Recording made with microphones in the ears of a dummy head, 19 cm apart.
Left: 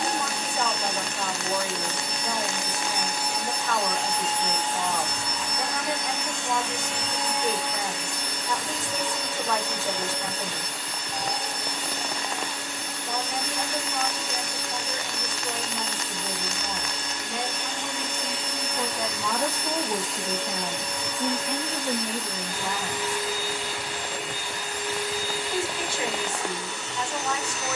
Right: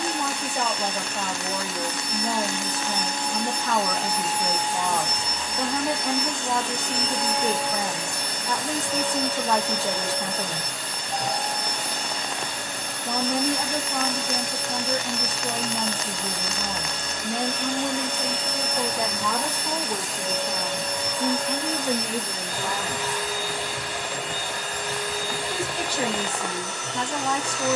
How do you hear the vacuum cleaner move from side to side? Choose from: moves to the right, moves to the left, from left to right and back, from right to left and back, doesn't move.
moves to the right.